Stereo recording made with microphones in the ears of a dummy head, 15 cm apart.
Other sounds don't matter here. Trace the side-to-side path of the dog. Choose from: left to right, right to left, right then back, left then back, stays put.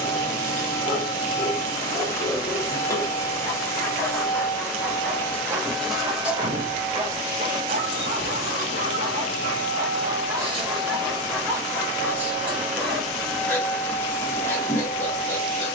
right then back.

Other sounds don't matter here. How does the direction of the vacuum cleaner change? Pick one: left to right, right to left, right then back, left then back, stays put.
right then back.